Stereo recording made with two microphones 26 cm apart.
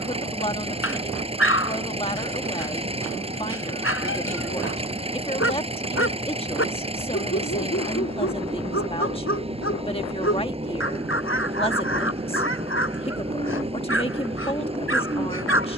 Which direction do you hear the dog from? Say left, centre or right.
left.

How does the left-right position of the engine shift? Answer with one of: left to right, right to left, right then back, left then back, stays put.
stays put.